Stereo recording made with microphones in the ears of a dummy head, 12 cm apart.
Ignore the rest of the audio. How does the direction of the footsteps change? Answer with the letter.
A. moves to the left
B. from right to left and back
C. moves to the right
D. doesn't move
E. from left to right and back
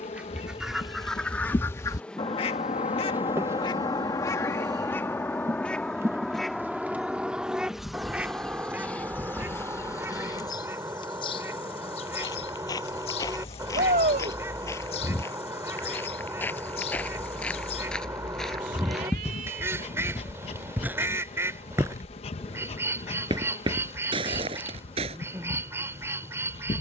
C.